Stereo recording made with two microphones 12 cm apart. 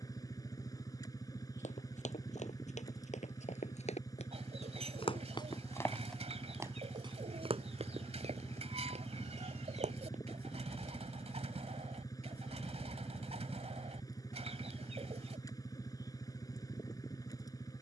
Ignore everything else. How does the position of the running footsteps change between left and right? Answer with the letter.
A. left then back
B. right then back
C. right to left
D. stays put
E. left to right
E.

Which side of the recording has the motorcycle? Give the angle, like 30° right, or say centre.
30° left.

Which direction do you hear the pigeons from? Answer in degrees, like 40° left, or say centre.
60° right.